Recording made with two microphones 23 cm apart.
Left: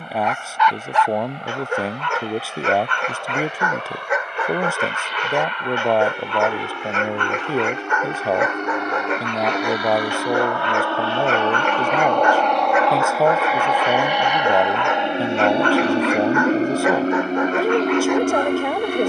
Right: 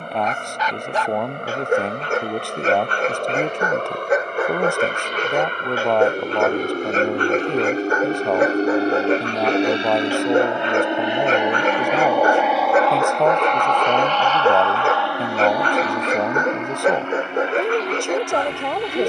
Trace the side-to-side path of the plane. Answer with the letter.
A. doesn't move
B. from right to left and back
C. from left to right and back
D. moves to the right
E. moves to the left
E.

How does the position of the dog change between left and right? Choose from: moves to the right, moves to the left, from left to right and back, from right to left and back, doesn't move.
doesn't move.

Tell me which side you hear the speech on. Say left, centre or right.
centre.